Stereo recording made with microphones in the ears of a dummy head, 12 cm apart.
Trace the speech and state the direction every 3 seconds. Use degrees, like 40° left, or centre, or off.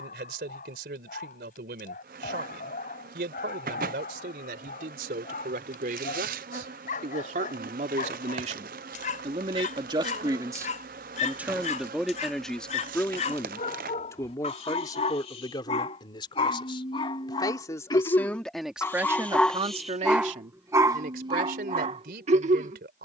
80° right, 80° right, 60° right, 20° right, 20° left, 30° left, 20° right, 80° right.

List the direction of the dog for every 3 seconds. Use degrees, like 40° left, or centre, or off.
70° left, 60° left, 60° left, 60° left, 50° left, 40° left, 10° left, 40° right.